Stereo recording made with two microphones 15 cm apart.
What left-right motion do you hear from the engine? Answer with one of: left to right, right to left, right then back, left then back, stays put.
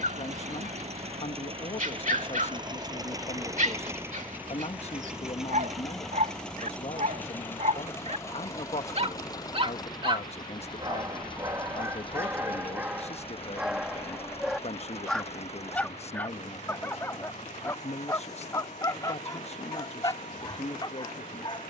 right to left.